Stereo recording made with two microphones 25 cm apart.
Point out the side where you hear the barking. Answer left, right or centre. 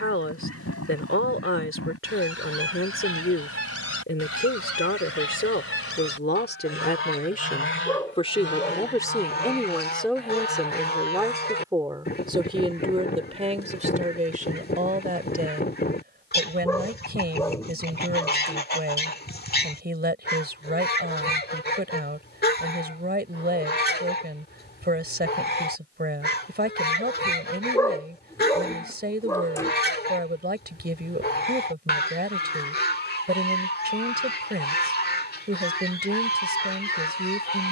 centre.